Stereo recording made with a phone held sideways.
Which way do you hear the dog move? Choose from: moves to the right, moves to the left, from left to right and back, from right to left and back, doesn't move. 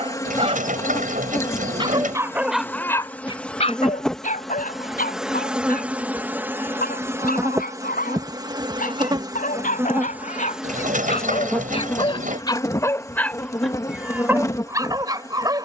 from right to left and back.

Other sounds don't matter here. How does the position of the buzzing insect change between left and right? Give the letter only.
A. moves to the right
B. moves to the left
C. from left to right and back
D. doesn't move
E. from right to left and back
C.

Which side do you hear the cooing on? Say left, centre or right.
right.